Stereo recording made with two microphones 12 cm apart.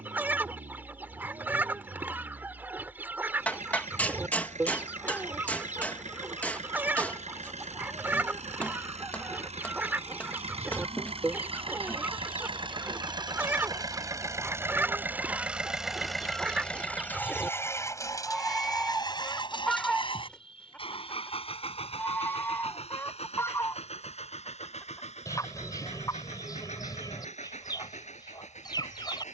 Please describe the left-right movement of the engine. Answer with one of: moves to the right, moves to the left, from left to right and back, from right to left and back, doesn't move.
moves to the left.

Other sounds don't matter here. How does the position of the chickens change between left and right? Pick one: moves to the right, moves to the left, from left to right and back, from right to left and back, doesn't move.
moves to the left.